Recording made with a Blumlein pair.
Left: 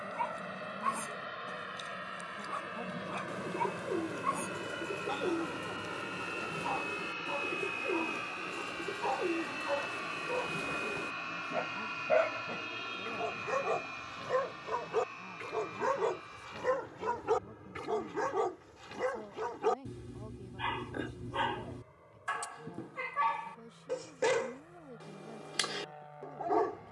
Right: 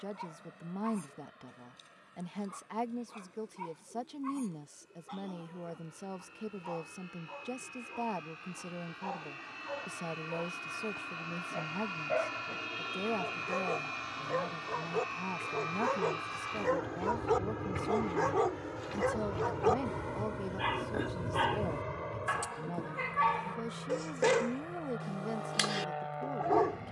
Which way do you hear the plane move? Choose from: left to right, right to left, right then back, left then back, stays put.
left to right.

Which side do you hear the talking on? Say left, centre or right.
right.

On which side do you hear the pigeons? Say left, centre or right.
left.